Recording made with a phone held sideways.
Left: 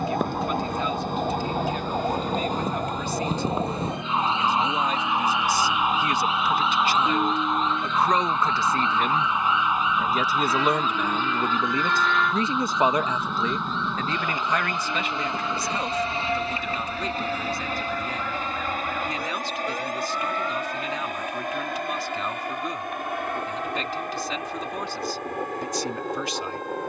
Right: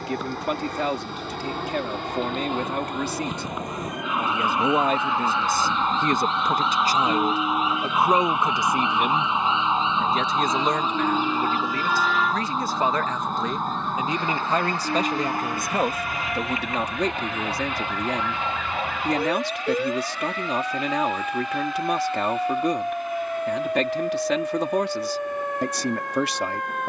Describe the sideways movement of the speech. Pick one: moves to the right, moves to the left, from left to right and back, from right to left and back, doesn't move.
from right to left and back.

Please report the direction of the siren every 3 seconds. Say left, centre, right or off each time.
left, left, centre, right, right, right, right, right, right.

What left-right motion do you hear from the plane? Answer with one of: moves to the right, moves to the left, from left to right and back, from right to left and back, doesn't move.
moves to the left.